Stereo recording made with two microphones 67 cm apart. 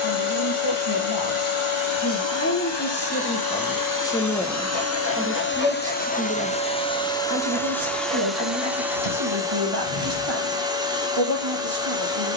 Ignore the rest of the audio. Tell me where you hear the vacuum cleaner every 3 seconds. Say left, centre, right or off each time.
left, left, centre, centre.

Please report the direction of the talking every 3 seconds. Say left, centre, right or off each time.
left, centre, right, right.